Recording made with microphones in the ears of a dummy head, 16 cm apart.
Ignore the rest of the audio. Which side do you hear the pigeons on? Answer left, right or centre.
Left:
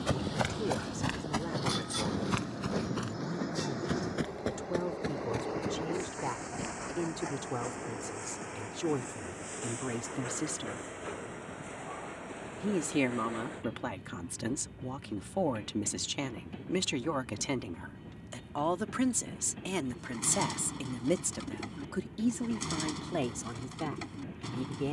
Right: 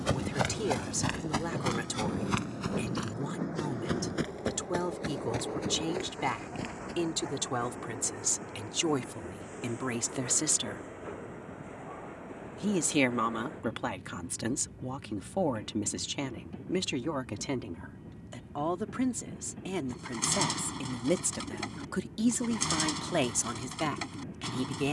right.